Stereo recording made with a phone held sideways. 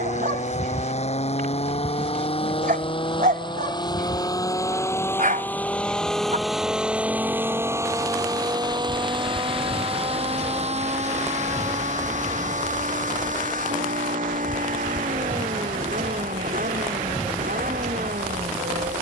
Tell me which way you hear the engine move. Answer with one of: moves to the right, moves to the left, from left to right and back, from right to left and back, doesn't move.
moves to the right.